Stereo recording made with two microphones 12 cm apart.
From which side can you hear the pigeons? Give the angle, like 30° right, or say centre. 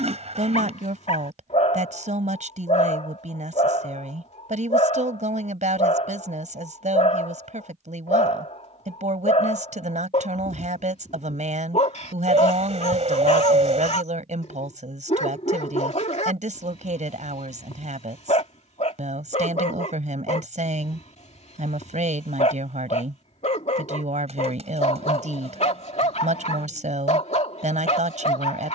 60° right.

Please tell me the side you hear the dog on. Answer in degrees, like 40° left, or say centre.
60° left.